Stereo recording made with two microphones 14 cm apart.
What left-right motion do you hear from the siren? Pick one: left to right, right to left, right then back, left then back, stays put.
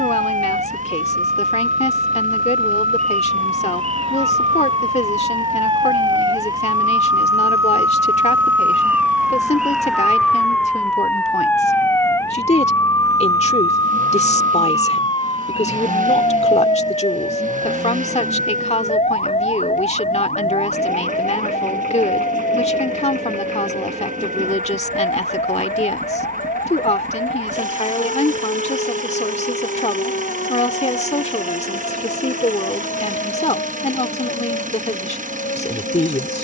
right to left.